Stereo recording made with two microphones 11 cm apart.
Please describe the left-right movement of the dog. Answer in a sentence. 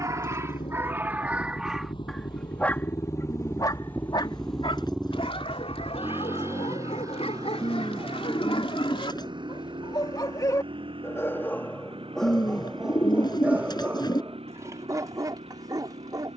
You can hear the dog move from right to left and back again.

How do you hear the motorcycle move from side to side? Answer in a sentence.
In this clip you hear the motorcycle travel towards the right.